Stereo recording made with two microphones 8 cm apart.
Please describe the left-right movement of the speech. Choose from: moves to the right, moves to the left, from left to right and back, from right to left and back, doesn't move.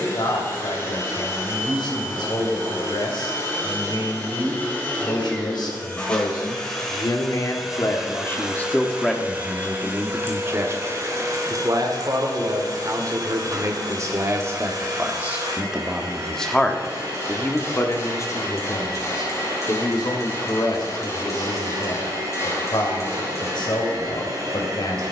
from left to right and back.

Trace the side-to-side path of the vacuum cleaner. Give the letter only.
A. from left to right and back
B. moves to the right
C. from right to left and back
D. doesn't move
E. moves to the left
B.